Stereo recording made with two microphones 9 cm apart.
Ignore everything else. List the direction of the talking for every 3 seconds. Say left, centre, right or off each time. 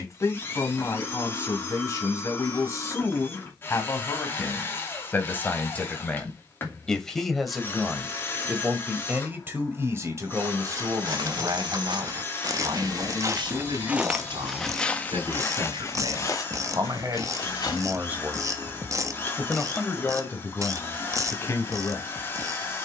left, left, centre, right, right, right, centre, left.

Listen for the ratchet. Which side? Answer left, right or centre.
right.